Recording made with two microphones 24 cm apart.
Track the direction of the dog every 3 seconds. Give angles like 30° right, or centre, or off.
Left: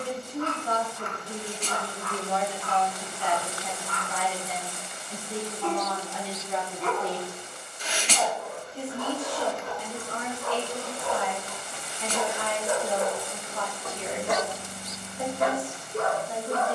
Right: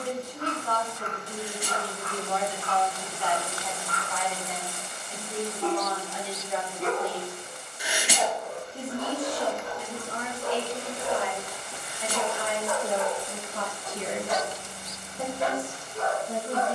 50° right, 50° right, 50° right, 20° right, 40° left, 60° left.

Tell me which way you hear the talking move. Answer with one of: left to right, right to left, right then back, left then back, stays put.
left to right.